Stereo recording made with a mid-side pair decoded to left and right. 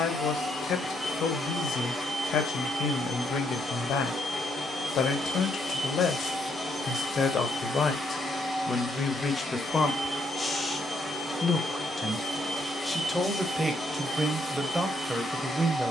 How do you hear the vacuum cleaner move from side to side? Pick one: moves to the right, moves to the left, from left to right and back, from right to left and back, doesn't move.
doesn't move.